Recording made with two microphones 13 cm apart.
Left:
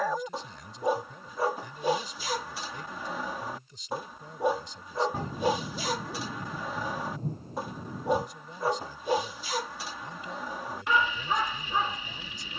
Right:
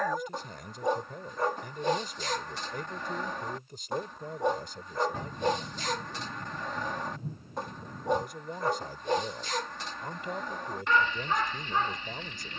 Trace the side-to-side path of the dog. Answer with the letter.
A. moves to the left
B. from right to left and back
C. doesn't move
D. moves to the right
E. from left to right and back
C.